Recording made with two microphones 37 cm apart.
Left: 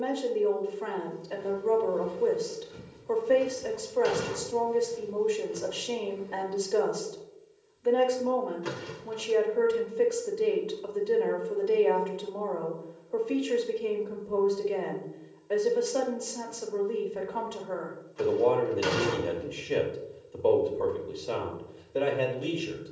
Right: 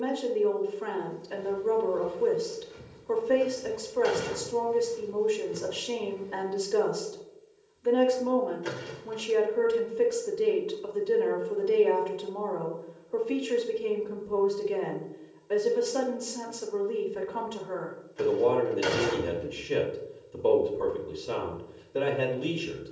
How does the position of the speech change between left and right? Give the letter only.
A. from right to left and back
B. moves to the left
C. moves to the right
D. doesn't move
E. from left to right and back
D.